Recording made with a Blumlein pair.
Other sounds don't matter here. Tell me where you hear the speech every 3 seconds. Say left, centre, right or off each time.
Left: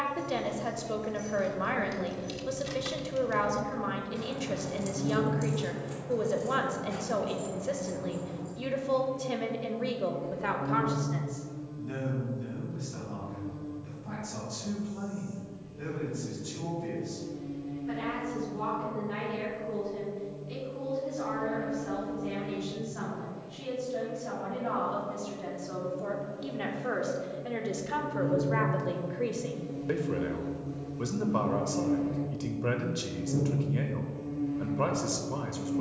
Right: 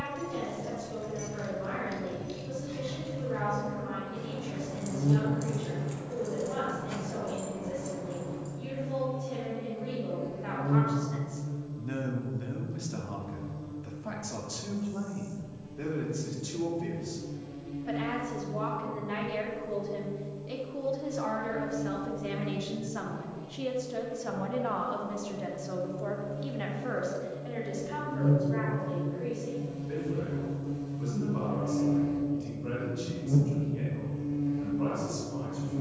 left, left, left, left, right, right, right, right, centre, left, left, left.